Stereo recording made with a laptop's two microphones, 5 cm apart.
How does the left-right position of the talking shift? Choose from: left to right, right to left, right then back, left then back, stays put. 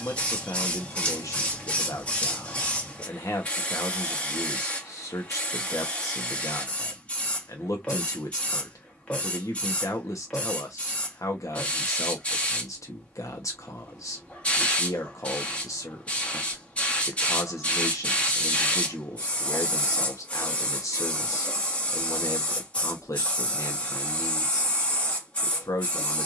stays put.